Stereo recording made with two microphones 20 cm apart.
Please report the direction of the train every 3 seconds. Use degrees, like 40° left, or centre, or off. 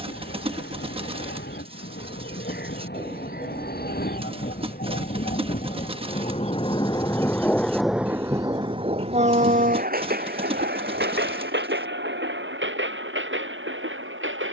70° left, 50° left, 10° left, 50° right, 70° right.